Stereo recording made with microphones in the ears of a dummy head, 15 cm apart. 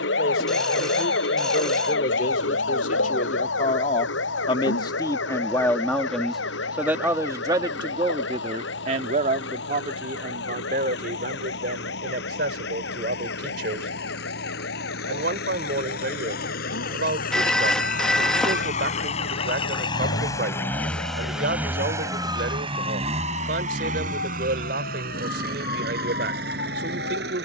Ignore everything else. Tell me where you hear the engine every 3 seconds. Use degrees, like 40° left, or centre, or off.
80° left, 80° left, 80° left, 70° left, 70° left, 60° left, 30° left, 30° right, 60° right.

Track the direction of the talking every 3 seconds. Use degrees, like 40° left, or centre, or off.
60° left, 30° left, 20° right, 50° right, 70° right, 70° right, 70° right, 70° right, 70° right.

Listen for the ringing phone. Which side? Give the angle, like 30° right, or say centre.
centre.